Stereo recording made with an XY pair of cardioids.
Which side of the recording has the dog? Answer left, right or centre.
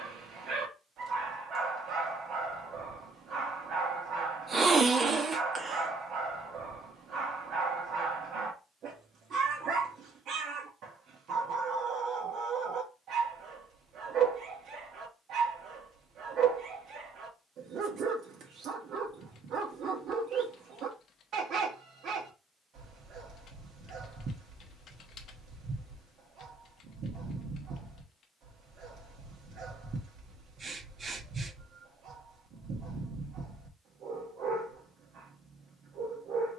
right.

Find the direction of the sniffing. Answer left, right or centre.
right.